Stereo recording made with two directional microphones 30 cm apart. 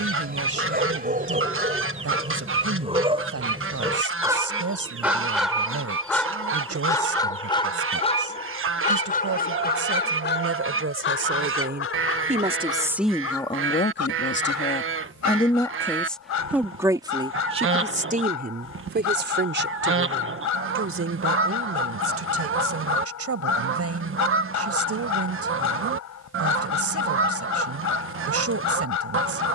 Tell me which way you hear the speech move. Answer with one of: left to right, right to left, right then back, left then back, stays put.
left then back.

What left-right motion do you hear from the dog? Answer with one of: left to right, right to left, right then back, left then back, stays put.
right to left.